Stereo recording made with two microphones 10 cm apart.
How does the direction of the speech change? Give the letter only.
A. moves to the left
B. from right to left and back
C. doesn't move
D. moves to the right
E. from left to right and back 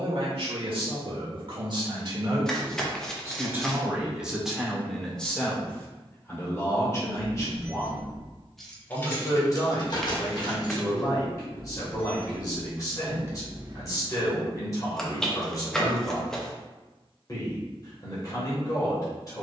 A.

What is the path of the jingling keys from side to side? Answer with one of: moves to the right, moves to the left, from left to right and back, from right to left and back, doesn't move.
from right to left and back.